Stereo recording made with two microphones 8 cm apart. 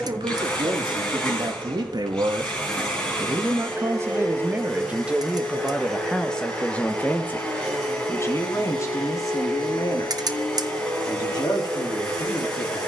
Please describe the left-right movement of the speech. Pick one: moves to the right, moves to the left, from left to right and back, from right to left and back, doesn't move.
moves to the left.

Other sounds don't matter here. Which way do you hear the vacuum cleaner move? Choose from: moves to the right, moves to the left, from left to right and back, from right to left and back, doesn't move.
doesn't move.